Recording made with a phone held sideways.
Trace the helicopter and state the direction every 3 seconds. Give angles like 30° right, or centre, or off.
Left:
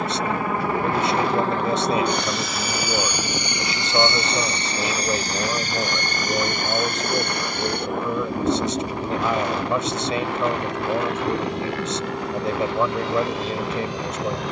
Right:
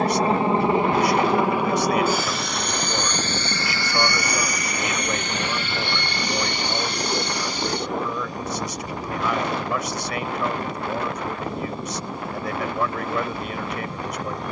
10° right, 30° left, 50° left, 60° left, 70° left.